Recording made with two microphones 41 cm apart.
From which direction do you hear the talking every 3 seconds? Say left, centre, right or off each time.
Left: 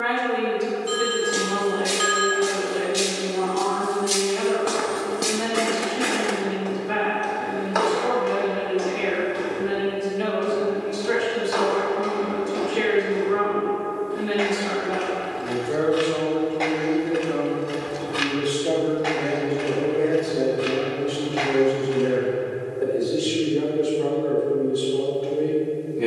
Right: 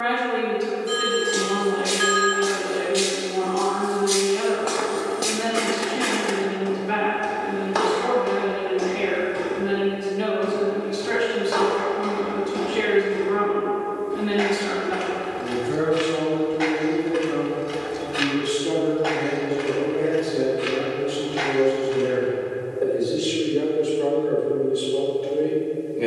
right, right, right, right, right, right, centre, left, left.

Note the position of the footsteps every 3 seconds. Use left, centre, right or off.
left, left, right, right, right, right, left, left, off.